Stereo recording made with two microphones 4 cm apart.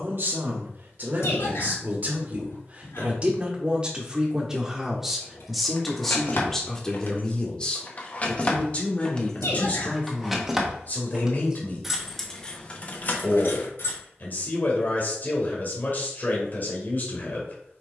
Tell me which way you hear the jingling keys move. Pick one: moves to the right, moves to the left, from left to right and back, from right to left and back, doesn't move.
from left to right and back.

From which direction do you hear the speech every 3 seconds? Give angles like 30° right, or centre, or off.
40° right, 10° right, 20° left, 40° left, 50° left, 50° left.